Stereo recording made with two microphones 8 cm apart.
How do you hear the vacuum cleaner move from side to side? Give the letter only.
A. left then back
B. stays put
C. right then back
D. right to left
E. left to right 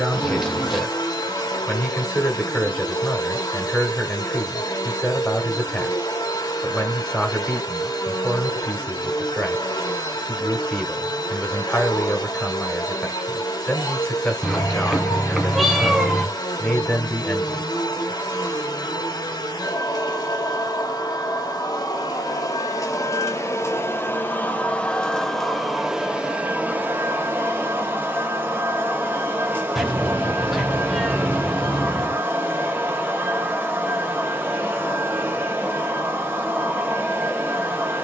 E.